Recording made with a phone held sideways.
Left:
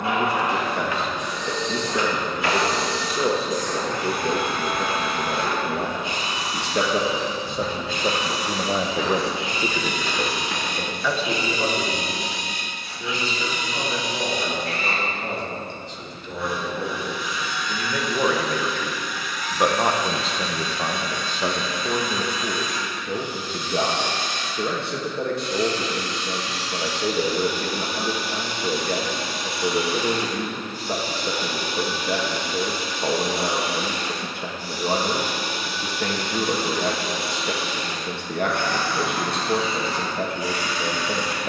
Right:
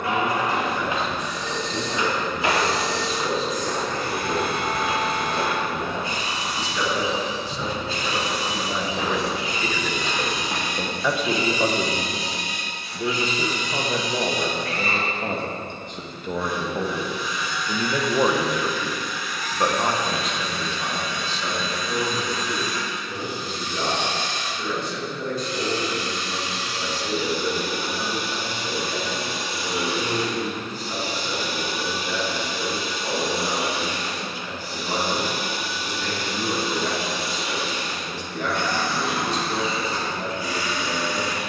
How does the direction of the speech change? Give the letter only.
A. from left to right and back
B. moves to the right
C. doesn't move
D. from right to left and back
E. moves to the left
A.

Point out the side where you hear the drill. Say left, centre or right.
left.